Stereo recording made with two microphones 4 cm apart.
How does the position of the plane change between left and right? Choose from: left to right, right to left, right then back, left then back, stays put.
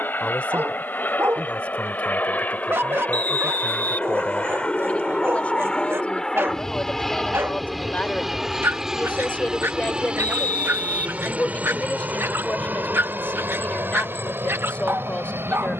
left to right.